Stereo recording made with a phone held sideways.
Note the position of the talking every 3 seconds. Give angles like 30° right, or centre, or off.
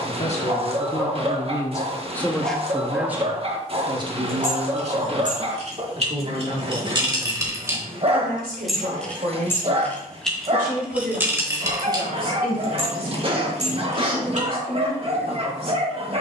20° left, 30° right, 60° right, 70° right, 80° right, 80° right.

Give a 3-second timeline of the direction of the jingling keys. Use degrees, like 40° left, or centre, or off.
off, 50° right, 20° right, 10° right, 50° right, off.